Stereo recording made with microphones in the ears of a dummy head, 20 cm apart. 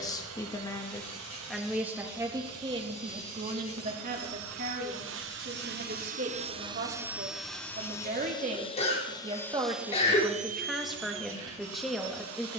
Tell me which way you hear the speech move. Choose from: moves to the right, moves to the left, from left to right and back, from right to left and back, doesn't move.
from left to right and back.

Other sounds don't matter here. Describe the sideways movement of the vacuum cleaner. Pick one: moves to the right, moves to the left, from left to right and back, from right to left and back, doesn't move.
from right to left and back.